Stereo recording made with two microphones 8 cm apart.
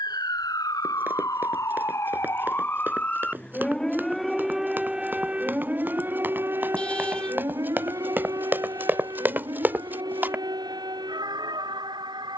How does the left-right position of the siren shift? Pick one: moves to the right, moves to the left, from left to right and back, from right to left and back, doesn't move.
moves to the right.